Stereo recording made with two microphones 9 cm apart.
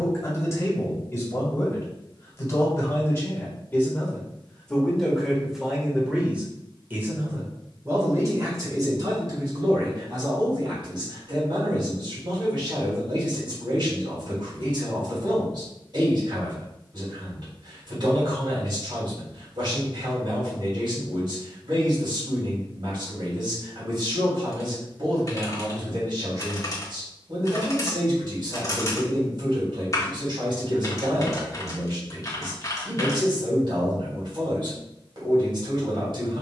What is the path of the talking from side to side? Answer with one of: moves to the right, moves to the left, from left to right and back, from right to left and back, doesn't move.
moves to the right.